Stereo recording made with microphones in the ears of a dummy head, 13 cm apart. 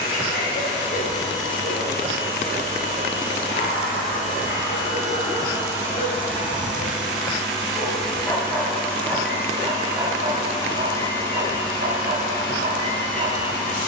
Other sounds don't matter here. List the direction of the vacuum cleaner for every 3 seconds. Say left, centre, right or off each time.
right, right, centre, left, left.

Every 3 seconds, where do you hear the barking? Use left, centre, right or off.
left, left, left, right, right.